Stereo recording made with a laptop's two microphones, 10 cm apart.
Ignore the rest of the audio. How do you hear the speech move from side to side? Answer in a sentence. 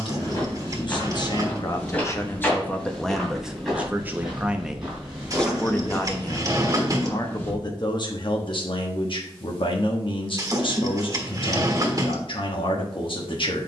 You can hear the speech go right and come back.